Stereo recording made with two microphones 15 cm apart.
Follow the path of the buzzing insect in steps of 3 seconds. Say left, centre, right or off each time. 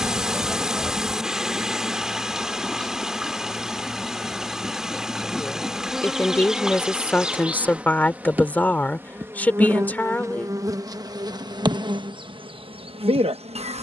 centre, centre, centre, right, right.